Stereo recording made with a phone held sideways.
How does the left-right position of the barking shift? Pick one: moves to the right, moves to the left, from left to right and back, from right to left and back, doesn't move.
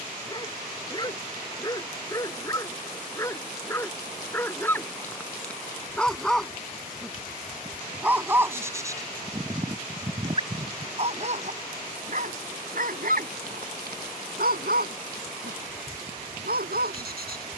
moves to the right.